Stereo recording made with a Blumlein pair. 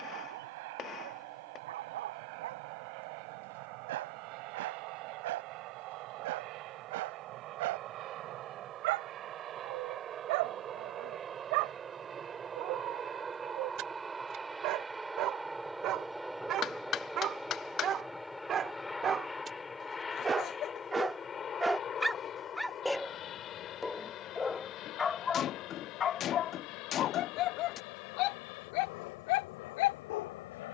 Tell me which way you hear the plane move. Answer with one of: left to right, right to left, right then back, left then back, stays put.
right to left.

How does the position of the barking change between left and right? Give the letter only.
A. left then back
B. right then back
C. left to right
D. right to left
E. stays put
D.